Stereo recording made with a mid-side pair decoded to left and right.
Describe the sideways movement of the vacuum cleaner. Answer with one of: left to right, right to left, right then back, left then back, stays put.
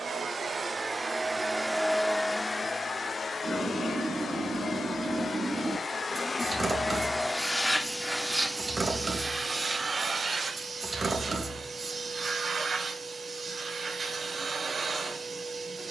left then back.